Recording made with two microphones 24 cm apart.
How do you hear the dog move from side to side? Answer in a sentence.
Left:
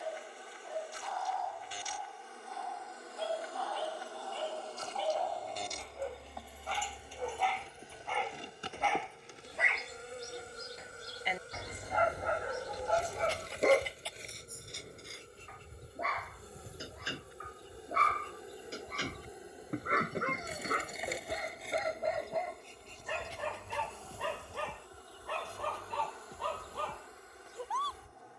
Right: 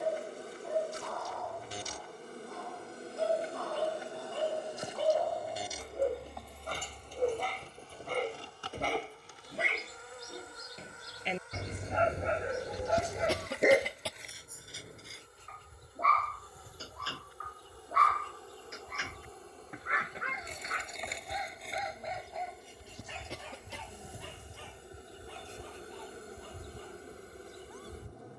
You can hear the dog move to the left.